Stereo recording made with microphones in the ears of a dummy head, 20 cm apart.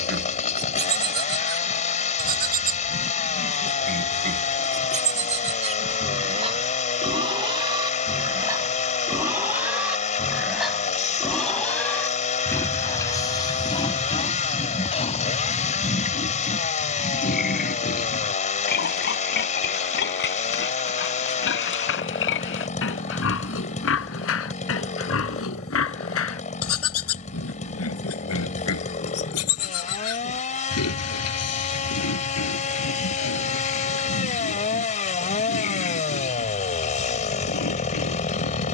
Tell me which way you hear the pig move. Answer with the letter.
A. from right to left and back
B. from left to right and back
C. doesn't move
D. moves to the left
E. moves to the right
D.